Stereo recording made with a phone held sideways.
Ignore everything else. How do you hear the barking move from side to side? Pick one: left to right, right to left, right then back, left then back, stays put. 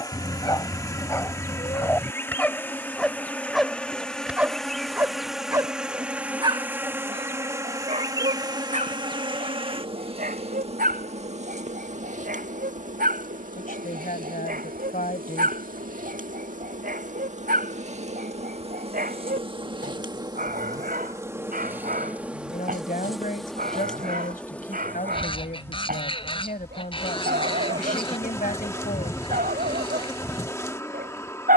left to right.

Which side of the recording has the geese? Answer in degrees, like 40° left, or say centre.
30° left.